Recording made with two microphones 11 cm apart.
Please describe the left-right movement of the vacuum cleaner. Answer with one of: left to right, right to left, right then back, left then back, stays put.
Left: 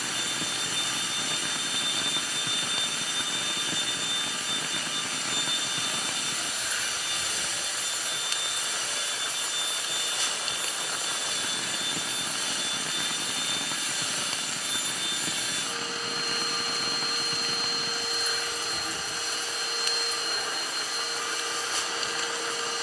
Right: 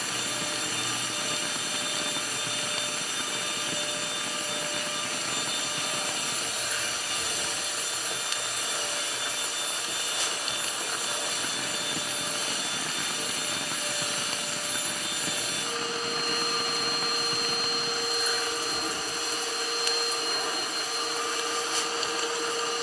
stays put.